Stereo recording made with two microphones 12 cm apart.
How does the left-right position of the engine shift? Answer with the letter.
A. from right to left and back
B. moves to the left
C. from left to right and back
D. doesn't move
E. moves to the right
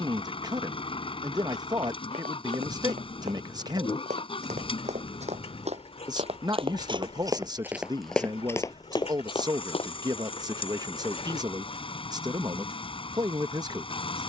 D.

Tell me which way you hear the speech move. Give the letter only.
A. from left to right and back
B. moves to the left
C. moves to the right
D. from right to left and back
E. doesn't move
E.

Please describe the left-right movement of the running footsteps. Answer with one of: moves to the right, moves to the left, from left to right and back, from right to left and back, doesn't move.
moves to the left.